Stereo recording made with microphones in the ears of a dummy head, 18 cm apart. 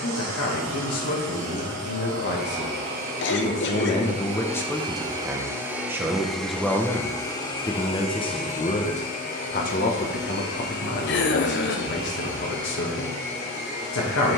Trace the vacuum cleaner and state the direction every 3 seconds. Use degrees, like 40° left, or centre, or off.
60° right, 30° right, 20° left, 50° left, 70° left.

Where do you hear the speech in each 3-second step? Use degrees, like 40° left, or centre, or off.
60° left, 10° left, 10° left, 50° left, 60° left.